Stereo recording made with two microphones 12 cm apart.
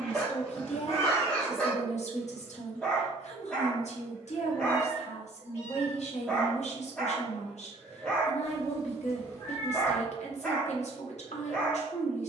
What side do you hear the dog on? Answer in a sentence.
In this clip you hear the dog in the centre.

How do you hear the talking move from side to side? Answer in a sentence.
You can hear the talking stay in one place.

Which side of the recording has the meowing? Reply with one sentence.
You can hear the meowing on the left.